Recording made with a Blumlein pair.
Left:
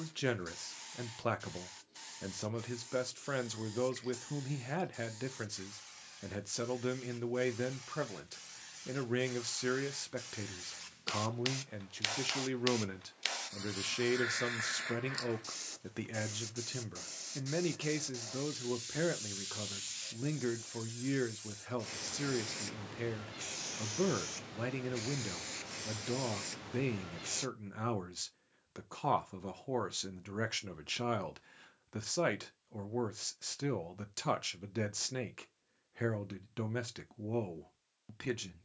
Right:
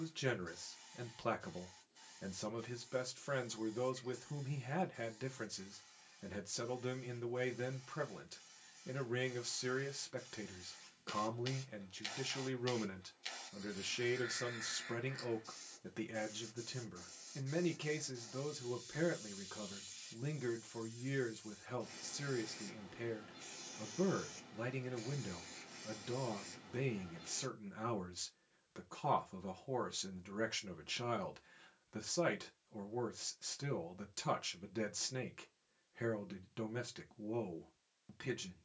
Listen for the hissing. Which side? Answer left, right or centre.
left.